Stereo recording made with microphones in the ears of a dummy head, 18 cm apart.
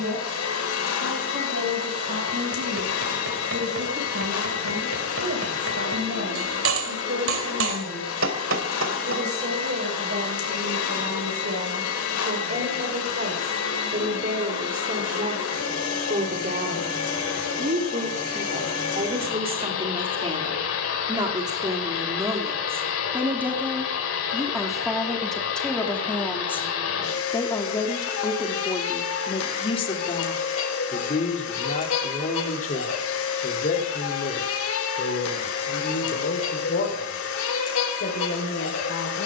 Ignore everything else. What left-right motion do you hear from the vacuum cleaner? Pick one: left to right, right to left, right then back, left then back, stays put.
stays put.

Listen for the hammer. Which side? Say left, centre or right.
right.